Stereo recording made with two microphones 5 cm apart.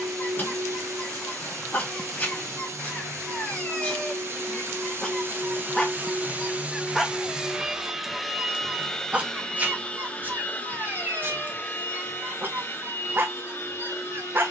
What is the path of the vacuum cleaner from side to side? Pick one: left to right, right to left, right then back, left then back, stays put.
right to left.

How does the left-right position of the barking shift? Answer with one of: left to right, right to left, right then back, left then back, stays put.
left to right.